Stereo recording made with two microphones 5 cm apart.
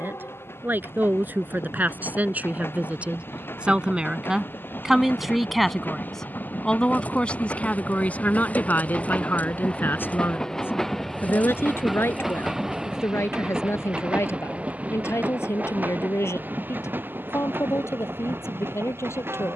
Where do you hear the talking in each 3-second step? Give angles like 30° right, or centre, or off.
40° right, 10° right, 30° left, 50° left, 70° left, 70° left, 80° left.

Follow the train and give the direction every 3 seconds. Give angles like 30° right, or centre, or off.
60° left, 50° left, 40° left, 10° left, 20° right, 40° right, 50° right.